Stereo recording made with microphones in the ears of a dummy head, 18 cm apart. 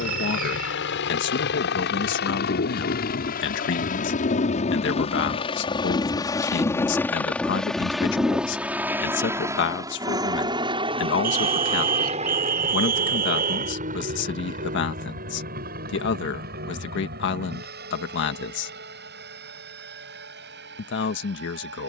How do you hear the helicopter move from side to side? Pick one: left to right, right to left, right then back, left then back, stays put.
left to right.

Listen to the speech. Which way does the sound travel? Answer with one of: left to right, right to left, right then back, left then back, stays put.
stays put.